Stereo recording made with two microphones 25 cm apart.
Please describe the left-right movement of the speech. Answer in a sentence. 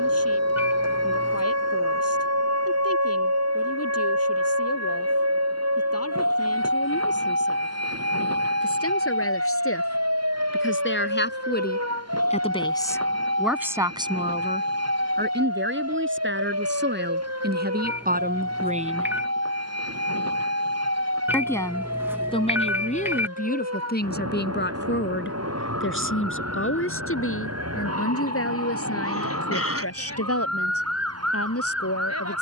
You can hear the speech go right and come back.